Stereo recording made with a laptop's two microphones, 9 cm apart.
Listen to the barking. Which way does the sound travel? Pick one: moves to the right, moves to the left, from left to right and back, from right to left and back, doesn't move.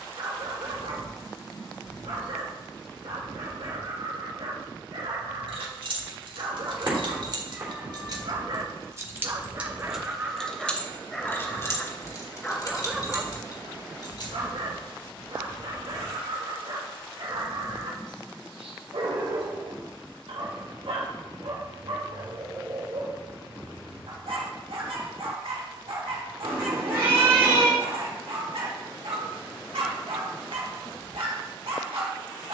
from right to left and back.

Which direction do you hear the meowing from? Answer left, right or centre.
right.